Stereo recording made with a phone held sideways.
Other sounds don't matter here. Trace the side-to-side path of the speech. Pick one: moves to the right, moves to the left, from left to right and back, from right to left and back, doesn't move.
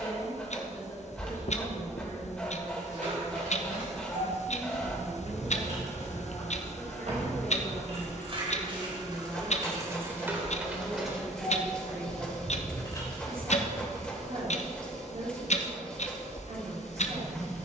moves to the right.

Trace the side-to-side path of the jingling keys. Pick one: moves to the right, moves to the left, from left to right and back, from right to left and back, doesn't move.
moves to the left.